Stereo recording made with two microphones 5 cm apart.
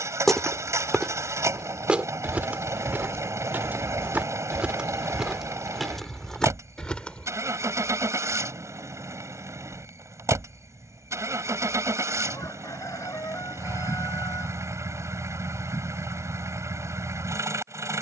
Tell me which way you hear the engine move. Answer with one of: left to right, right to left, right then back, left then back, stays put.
stays put.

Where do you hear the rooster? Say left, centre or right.
left.